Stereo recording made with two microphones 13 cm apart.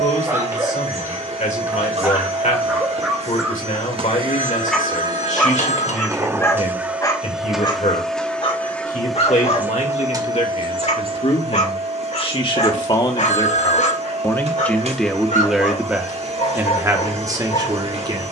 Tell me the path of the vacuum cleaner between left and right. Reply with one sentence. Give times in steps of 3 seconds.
In this clip you hear the vacuum cleaner on the right from 0 s, in the centre from 6 s and on the right from 9 s.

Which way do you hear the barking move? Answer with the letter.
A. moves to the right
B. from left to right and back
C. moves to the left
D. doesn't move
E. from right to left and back
C.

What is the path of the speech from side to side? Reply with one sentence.
In this clip you hear the speech go from the left side to the right.